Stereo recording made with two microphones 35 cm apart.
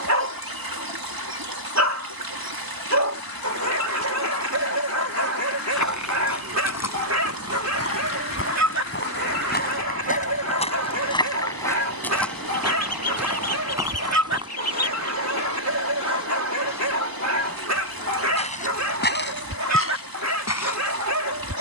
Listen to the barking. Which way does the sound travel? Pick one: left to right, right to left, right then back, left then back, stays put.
stays put.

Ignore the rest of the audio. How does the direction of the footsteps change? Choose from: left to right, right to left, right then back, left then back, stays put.
right then back.